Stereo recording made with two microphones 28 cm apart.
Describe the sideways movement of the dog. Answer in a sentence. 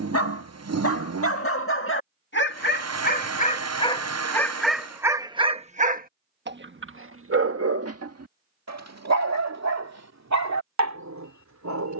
In this clip you hear the dog go from the left side to the right.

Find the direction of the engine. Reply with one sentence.
You can hear the engine on the right.